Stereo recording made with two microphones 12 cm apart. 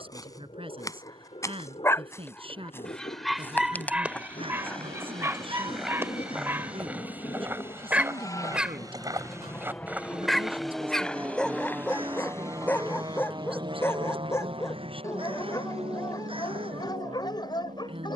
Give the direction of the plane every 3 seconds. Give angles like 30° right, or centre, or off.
60° left, 50° left, 40° left, 10° left, 30° right, 60° right.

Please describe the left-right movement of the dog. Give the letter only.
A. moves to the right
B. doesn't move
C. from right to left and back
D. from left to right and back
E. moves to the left
D.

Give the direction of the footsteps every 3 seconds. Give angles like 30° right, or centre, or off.
20° left, 10° left, 20° right, centre, 30° left, off.